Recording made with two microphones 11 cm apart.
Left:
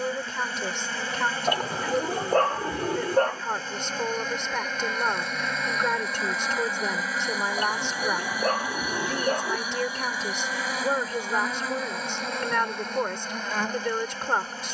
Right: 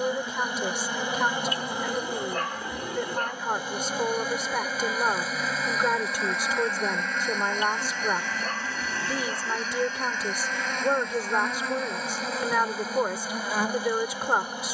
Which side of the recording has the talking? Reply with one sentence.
You can hear the talking in the centre.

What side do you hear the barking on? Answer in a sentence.
You can hear the barking on the left.